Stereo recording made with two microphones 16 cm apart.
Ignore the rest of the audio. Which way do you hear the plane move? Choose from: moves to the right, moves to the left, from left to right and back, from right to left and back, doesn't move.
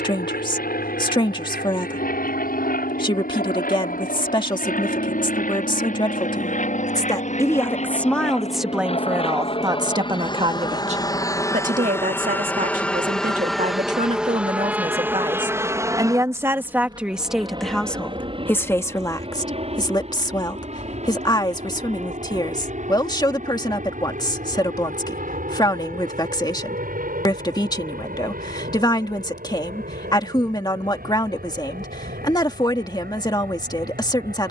moves to the right.